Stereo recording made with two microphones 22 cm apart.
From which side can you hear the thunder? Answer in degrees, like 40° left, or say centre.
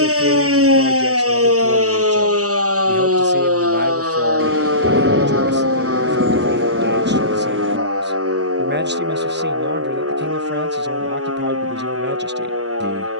60° right.